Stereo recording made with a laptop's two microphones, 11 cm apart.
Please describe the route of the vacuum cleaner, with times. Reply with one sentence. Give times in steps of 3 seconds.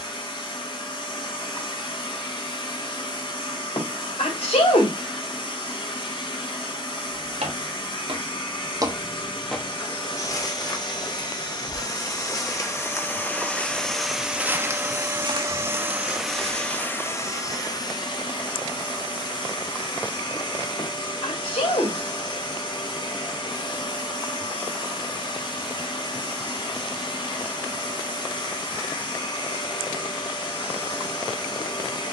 In this clip you hear the vacuum cleaner on the left from 0 s, in the centre from 12 s and on the left from 18 s.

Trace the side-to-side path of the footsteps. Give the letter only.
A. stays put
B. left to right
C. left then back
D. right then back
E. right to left
C.